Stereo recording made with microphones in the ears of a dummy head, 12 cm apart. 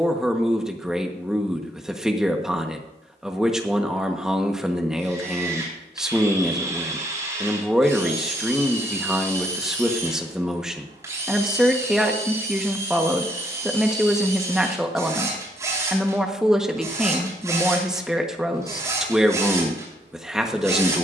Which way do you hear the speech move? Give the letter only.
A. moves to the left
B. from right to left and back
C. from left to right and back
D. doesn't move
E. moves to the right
D.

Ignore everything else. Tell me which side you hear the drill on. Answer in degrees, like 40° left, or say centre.
20° right.